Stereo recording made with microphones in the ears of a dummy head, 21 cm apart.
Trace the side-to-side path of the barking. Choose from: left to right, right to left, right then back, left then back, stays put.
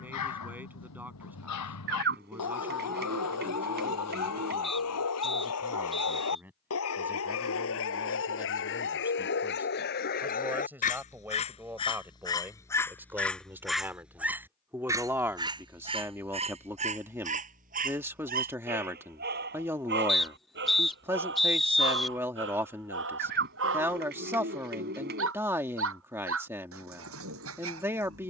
left to right.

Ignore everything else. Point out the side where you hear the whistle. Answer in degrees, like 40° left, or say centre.
centre.